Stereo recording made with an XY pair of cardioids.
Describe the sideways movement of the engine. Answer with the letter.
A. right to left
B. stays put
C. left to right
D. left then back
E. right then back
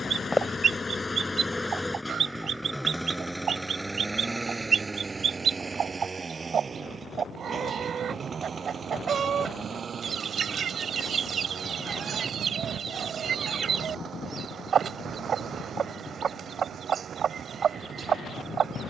C.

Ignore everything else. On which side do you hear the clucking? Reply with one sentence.
You can hear the clucking on the right.